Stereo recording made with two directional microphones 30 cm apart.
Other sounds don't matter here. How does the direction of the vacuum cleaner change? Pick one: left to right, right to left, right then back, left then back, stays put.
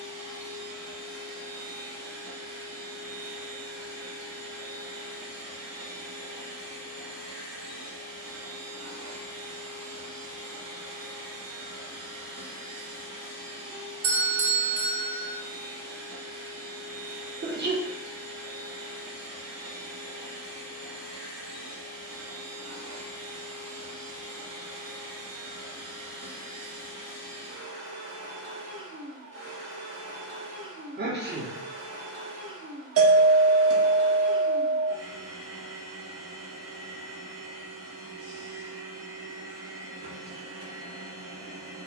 stays put.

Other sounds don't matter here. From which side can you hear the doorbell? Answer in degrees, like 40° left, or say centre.
50° right.